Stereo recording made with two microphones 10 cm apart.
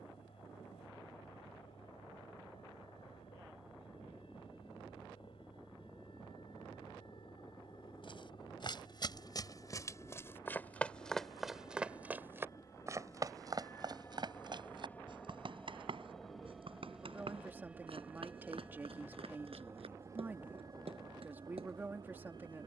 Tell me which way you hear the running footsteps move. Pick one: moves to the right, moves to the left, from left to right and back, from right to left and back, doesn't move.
moves to the right.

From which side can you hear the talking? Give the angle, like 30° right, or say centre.
20° right.